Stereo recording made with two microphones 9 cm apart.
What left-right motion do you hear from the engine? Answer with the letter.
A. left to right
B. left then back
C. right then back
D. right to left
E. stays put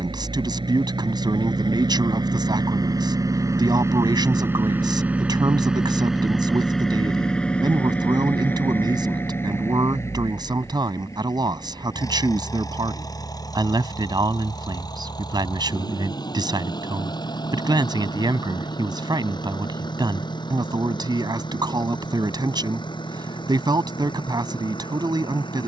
D.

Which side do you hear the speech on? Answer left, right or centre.
right.